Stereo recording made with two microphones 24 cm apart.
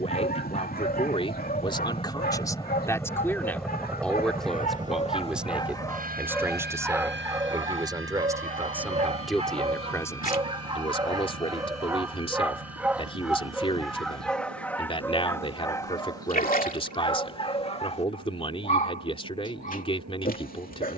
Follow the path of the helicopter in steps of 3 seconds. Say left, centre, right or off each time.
left, centre, right, right, right, right, right.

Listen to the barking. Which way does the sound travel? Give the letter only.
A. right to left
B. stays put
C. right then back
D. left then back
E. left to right
C.